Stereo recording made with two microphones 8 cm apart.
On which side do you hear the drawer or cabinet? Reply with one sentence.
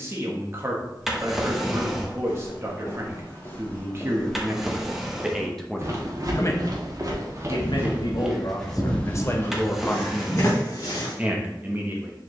In this clip you hear the drawer or cabinet in the centre.